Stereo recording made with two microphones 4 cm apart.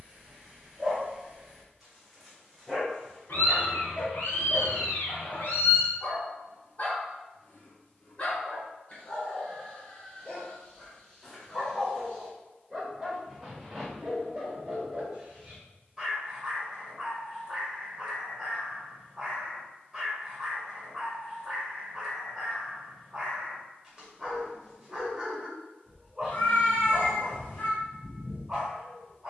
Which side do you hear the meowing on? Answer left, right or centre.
left.